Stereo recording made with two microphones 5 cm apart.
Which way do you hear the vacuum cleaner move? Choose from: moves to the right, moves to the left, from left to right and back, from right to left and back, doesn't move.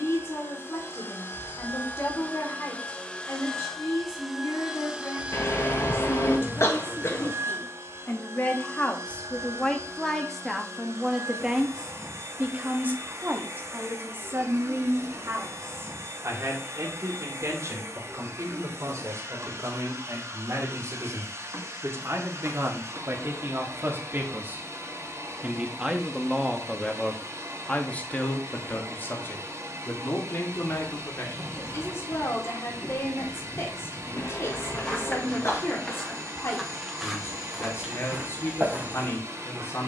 moves to the right.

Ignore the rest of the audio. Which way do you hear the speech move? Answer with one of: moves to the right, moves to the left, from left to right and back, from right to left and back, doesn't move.
from left to right and back.